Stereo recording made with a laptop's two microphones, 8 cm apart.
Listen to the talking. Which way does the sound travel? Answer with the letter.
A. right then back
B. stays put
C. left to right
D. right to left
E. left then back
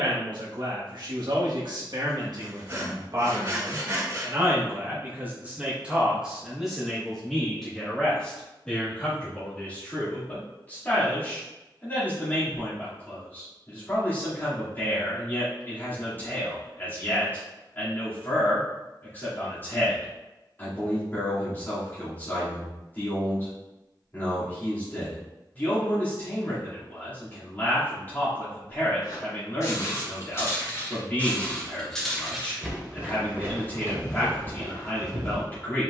D.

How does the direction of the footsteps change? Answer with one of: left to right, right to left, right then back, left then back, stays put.
left to right.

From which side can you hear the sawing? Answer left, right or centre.
right.